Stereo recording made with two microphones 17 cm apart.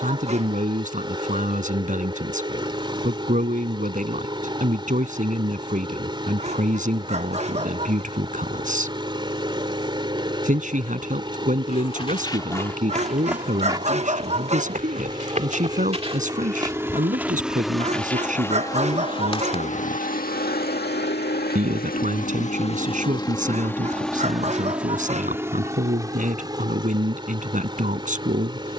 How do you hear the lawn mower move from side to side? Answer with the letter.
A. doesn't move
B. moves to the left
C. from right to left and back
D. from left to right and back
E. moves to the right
C.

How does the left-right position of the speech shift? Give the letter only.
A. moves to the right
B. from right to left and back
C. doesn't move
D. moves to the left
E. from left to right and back
C.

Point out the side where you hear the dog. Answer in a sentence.
You can hear the dog on the right.